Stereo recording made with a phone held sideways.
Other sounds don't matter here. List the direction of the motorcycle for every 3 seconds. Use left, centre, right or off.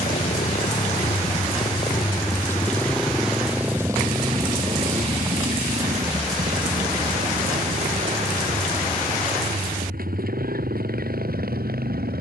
left, right, right, right.